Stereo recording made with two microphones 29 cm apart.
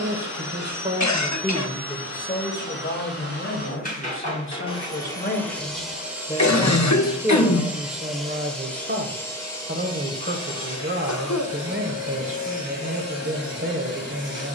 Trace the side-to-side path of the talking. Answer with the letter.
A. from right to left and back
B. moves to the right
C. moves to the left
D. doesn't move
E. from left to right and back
A.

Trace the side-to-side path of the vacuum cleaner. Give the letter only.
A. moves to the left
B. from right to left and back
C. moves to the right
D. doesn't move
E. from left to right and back
E.